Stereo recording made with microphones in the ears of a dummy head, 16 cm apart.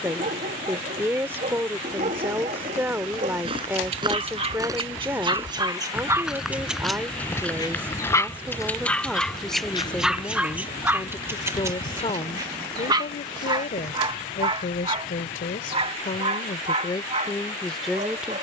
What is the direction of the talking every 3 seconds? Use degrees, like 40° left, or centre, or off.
10° right, 10° right, 10° right, 10° left, 40° left, 30° left.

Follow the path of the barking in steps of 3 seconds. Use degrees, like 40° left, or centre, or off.
40° right, 30° right, 10° left, 10° right, 30° right, 40° right.